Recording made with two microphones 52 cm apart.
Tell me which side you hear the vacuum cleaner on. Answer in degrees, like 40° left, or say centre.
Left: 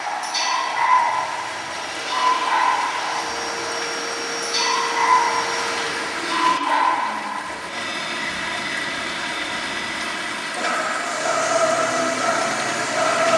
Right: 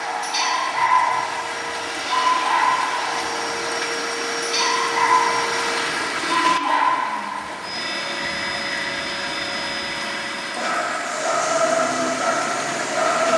70° right.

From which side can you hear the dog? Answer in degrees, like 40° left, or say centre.
80° right.